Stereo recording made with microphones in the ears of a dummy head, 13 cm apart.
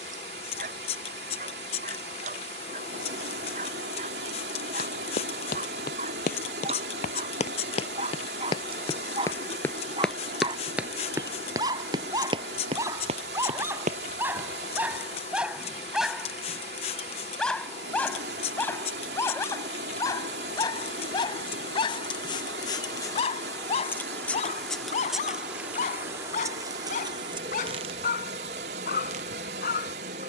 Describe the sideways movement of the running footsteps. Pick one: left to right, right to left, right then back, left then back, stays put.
left to right.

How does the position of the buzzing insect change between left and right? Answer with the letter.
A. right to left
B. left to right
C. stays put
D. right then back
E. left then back
B.